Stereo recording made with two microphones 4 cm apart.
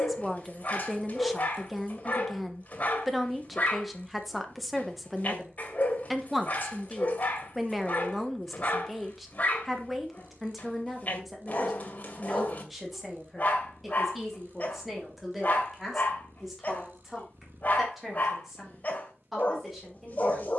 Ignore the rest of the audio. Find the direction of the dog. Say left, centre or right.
left.